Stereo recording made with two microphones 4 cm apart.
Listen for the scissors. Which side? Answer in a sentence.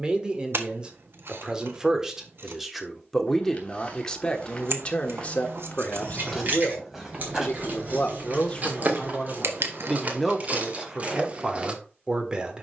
You can hear the scissors on the right.